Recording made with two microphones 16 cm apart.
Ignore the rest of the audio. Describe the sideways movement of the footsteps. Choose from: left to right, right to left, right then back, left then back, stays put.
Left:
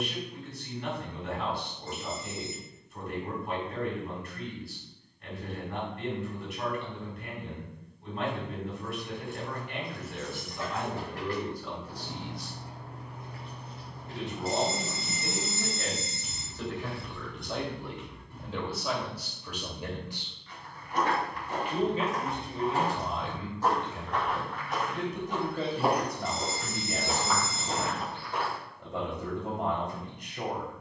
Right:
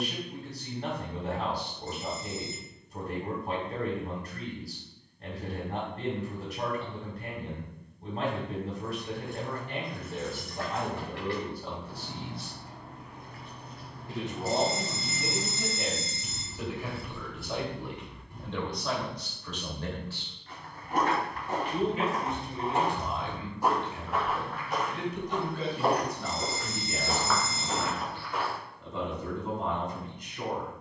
right to left.